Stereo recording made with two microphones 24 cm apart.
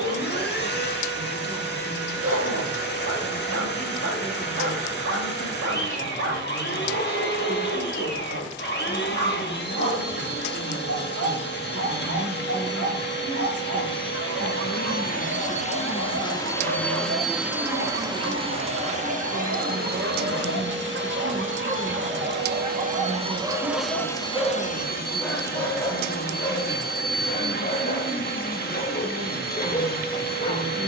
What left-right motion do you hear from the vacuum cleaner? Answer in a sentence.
You can hear the vacuum cleaner go right and come back.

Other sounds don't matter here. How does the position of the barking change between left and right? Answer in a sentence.
You can hear the barking move from right to left.